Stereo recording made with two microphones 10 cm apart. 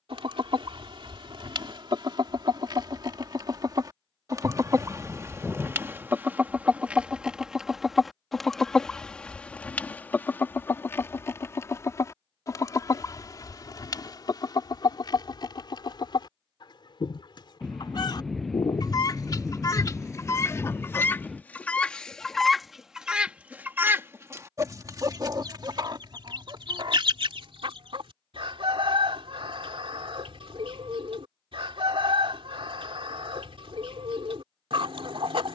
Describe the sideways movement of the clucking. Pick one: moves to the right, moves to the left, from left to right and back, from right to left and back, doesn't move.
from right to left and back.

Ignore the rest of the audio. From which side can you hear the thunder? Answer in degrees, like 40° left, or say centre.
centre.